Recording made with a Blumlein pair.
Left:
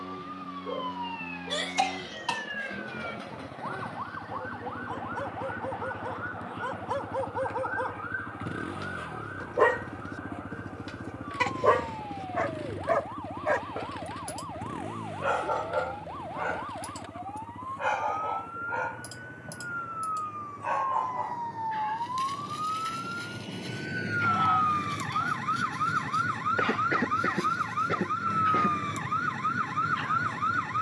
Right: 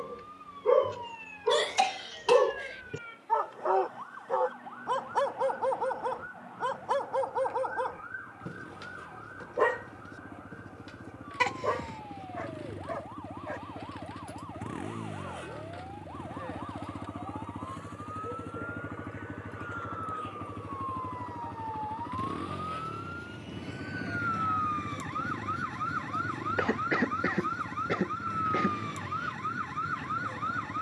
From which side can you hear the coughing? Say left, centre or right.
centre.